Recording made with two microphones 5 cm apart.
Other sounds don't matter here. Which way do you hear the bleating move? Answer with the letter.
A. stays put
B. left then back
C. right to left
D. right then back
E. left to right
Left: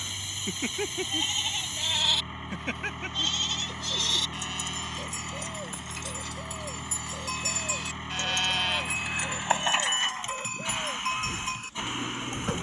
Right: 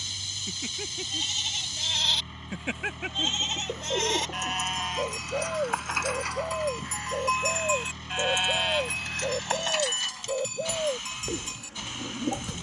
D.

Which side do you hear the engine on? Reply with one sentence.
In this clip you hear the engine on the left.